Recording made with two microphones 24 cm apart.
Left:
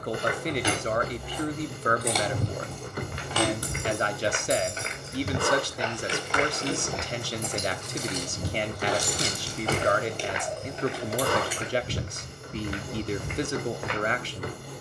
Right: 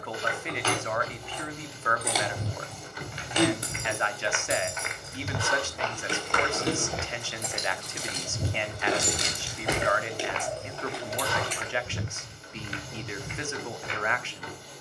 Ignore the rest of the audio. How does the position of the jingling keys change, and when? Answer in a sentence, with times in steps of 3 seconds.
In this clip you hear the jingling keys in the centre from 0 s, on the right from 3 s, in the centre from 9 s and not at all from 12 s.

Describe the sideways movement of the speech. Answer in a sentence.
In this clip you hear the speech stay put.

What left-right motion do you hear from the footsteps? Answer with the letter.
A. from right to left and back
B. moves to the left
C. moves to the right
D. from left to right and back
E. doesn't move
D.